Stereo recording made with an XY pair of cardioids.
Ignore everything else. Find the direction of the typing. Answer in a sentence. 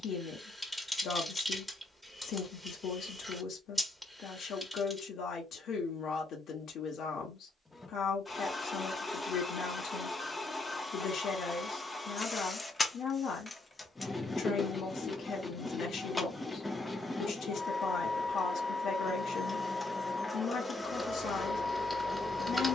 In this clip you hear the typing in the centre.